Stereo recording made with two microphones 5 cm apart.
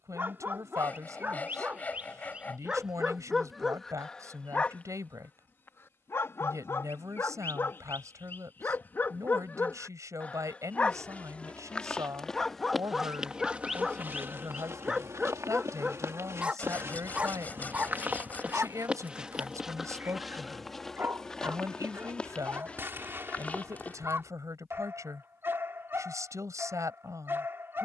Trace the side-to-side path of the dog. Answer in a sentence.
In this clip you hear the dog go left and come back.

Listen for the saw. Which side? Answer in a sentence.
You can hear the saw on the left.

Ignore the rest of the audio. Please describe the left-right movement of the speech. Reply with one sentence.
You can hear the speech stay put.